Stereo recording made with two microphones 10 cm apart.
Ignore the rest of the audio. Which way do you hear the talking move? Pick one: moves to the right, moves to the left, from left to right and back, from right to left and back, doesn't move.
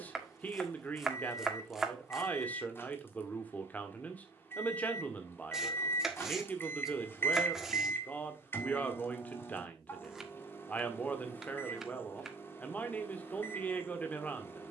doesn't move.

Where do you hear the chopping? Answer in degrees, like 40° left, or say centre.
centre.